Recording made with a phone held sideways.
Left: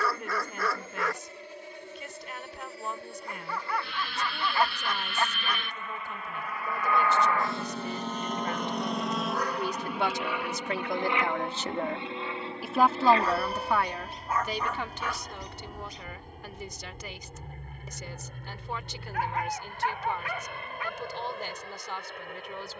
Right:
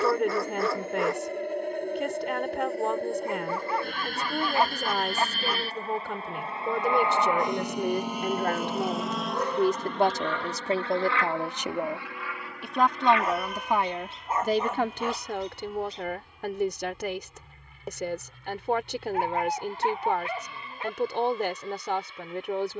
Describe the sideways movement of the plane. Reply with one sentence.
You can hear the plane go from the right side to the left.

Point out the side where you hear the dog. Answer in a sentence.
You can hear the dog on the right.